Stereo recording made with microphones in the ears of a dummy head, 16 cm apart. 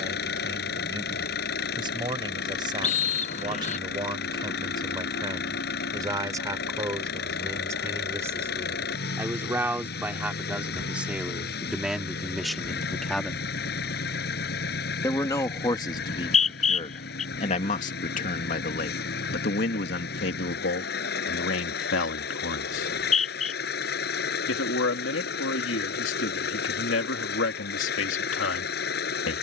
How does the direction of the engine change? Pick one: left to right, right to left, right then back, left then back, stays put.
stays put.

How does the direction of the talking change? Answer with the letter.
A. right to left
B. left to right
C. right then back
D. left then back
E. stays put
A.